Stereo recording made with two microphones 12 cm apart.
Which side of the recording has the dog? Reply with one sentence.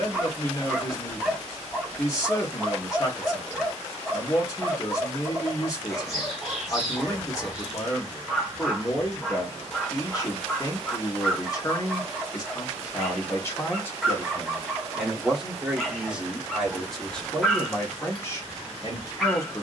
In this clip you hear the dog in the centre.